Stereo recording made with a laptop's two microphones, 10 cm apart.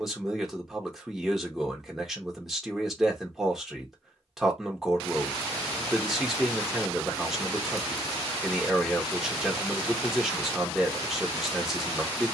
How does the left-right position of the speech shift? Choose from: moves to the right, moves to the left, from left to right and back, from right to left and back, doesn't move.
doesn't move.